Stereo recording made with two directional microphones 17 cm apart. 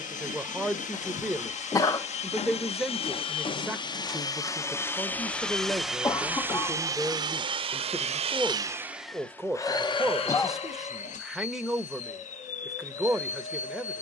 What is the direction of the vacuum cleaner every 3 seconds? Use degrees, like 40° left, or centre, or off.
40° left, 20° left, 20° right, 30° left, 50° left.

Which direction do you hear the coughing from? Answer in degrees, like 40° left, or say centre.
20° left.